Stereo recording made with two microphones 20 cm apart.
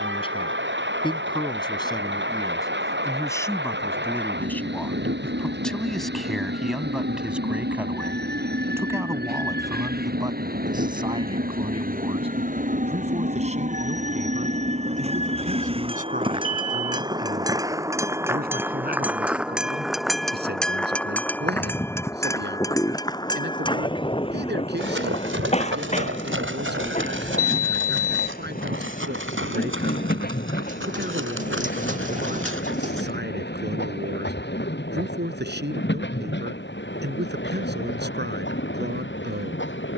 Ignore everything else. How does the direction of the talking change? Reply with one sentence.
You can hear the talking travel towards the right.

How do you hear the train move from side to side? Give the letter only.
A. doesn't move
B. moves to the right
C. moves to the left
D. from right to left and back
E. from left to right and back
C.